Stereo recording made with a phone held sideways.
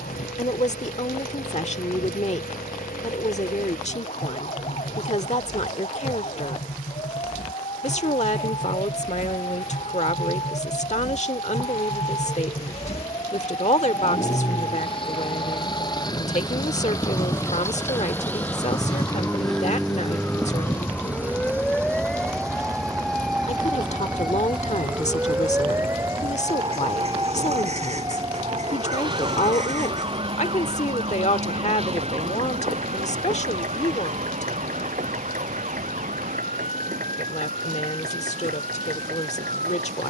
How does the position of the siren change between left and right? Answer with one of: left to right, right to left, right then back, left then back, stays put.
left to right.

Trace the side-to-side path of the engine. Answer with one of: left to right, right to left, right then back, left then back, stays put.
left to right.